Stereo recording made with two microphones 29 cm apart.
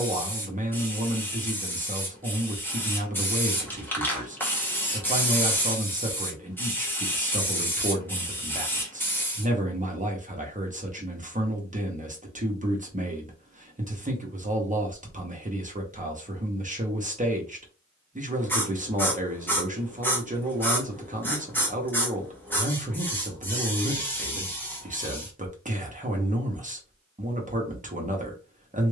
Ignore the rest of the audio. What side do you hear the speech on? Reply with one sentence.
You can hear the speech on the right.